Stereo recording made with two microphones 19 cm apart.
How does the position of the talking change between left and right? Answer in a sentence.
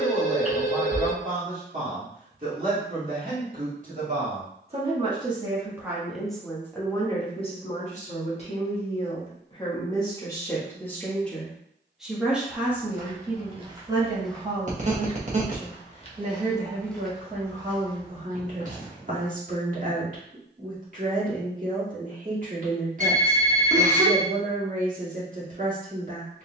You can hear the talking move from right to left and back again.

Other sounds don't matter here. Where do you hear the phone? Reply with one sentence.
In this clip you hear the phone on the right.